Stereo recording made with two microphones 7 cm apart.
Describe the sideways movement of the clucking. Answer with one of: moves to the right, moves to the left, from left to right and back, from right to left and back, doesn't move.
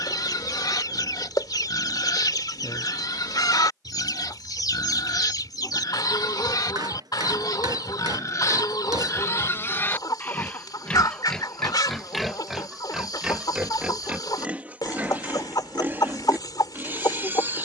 doesn't move.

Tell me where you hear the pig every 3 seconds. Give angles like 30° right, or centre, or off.
70° left, 70° left, 60° left, 20° left, 10° right, 30° right.